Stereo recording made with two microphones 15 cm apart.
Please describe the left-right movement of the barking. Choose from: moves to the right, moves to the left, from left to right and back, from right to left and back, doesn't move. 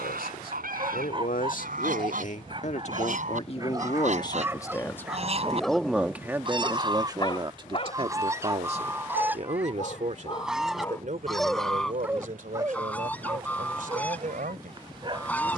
from right to left and back.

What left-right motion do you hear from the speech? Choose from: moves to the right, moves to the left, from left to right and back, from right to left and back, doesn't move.
moves to the right.